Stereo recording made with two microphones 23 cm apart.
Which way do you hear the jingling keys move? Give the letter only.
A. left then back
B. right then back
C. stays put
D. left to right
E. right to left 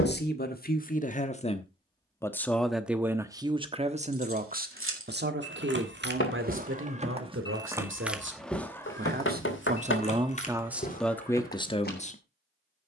E.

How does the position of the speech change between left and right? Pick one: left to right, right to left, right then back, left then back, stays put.
right then back.